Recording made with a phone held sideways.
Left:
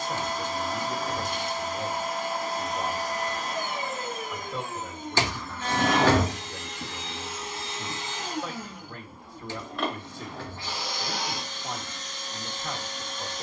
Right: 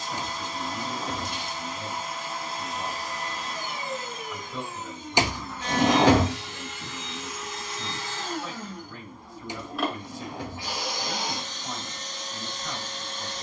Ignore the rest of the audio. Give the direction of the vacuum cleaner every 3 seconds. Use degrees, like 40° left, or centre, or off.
50° left, 50° left, 30° left, 10° right, 30° right.